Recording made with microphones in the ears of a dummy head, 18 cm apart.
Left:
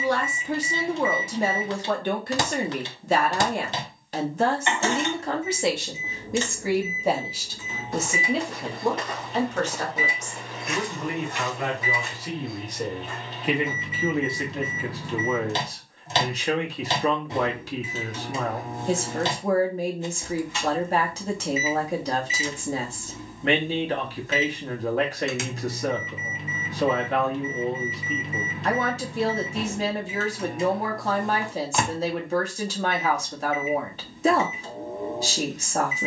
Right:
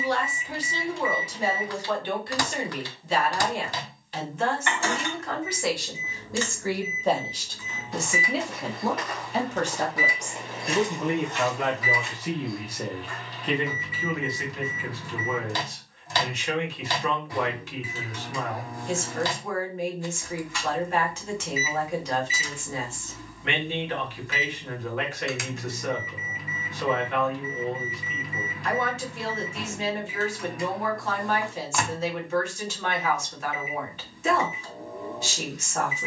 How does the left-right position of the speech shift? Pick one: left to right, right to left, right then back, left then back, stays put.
right then back.